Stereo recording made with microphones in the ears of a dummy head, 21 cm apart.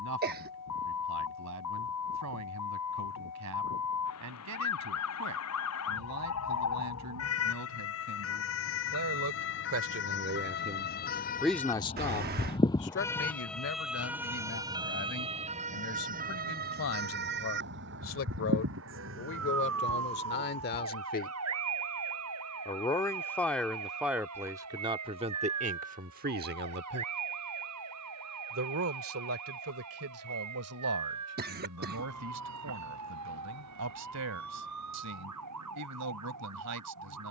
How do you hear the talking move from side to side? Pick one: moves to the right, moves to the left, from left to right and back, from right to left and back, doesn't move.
from right to left and back.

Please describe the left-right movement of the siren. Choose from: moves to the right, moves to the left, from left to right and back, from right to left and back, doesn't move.
moves to the right.